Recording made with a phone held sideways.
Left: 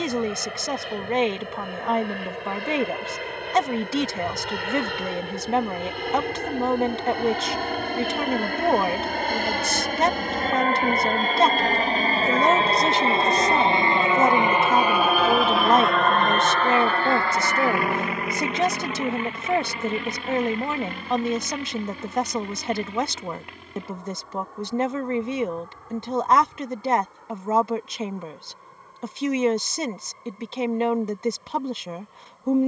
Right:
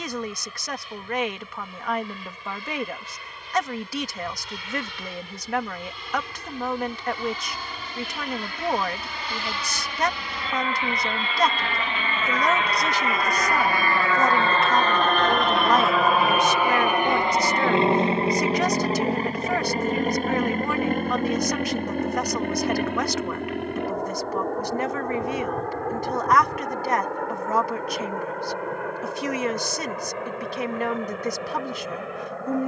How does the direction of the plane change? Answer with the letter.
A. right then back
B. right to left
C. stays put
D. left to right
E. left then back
D.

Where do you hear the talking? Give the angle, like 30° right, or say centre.
30° left.